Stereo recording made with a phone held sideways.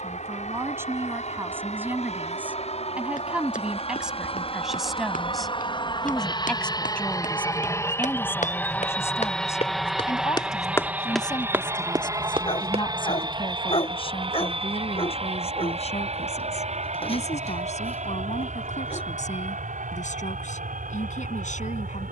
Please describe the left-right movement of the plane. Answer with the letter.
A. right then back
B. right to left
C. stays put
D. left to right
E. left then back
D.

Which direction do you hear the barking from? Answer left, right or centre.
left.